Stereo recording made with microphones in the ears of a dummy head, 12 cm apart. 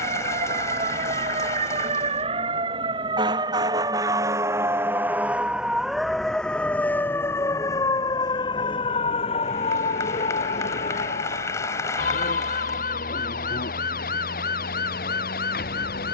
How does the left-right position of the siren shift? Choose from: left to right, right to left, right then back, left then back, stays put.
right to left.